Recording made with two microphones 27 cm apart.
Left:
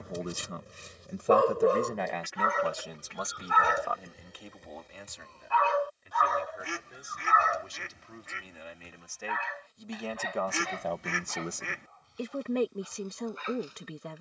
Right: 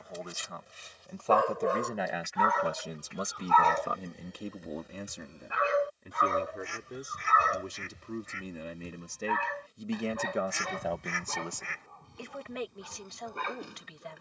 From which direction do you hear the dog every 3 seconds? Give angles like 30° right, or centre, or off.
40° left, centre, 40° right, 60° right, 60° right.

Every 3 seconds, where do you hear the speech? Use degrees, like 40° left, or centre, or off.
10° left, 40° right, 60° right, 10° right, 50° left.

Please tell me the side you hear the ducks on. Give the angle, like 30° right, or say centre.
70° left.